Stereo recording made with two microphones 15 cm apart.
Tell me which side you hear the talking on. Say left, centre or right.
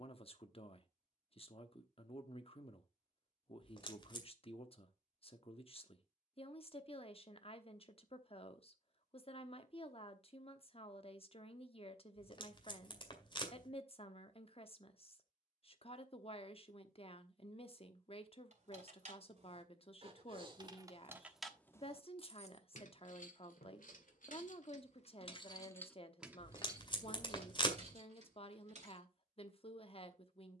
left.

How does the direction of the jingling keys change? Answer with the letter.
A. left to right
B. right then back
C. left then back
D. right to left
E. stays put
C.